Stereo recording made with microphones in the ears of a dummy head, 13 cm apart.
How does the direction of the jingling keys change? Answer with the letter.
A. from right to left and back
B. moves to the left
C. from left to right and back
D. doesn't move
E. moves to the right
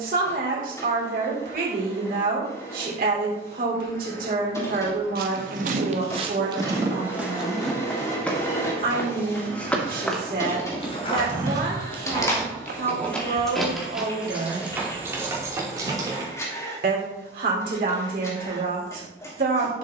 E.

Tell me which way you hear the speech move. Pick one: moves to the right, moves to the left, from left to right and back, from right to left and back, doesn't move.
doesn't move.